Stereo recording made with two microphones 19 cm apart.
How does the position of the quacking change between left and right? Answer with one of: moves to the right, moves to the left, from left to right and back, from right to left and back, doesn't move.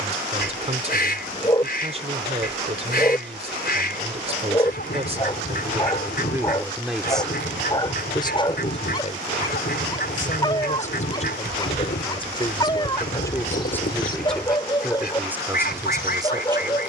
doesn't move.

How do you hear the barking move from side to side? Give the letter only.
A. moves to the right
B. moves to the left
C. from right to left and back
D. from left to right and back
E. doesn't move
E.